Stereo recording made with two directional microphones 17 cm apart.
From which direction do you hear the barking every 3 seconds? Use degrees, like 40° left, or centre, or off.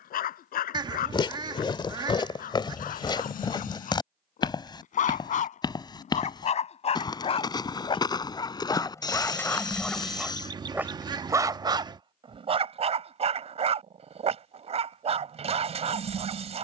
60° left, 50° left, 30° left, centre, 40° right, 40° right.